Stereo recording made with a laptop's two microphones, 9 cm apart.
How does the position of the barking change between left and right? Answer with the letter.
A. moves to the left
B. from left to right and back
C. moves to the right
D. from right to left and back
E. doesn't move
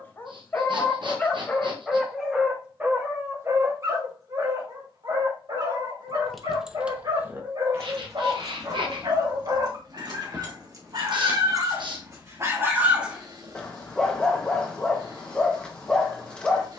B.